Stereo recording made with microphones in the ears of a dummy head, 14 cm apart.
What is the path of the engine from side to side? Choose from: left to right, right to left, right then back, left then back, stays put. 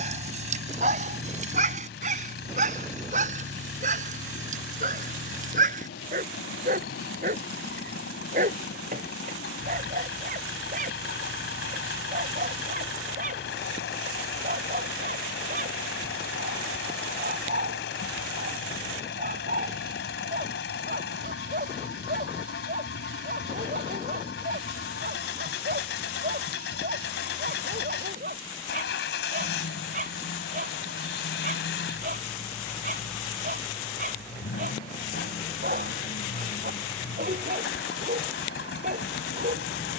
stays put.